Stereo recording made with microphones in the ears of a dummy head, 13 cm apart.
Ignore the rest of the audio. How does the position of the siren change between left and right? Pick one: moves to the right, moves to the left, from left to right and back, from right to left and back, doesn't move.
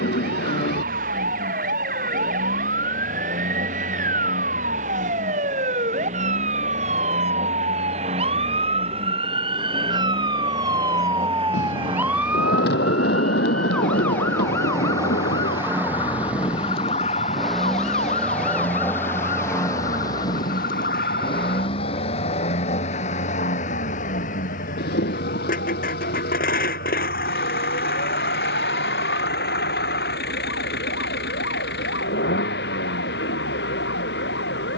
moves to the left.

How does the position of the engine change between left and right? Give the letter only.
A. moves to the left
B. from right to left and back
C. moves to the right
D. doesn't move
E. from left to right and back
A.